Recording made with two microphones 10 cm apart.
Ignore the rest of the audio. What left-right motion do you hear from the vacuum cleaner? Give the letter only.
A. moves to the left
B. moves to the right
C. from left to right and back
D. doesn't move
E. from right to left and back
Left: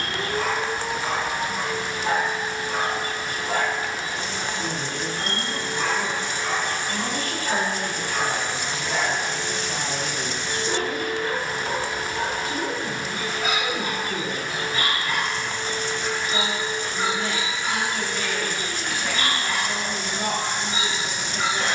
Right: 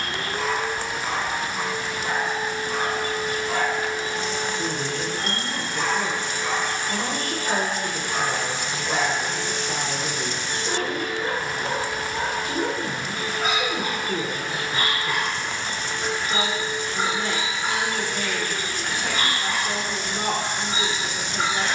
D.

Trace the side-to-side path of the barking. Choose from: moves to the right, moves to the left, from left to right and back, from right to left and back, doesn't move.
moves to the right.